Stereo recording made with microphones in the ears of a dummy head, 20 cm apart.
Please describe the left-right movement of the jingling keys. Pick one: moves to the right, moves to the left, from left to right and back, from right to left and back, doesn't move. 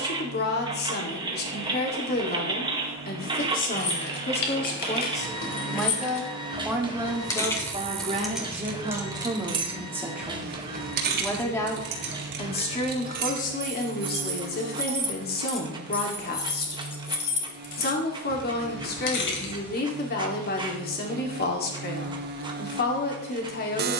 from left to right and back.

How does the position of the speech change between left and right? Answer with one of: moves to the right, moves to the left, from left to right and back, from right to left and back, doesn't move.
from left to right and back.